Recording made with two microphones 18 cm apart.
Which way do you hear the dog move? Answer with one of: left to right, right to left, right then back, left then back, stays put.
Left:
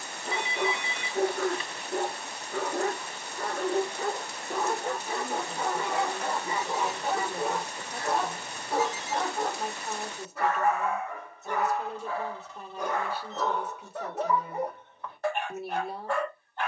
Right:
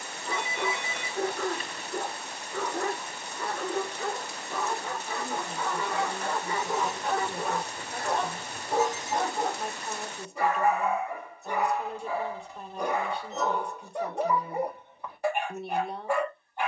left to right.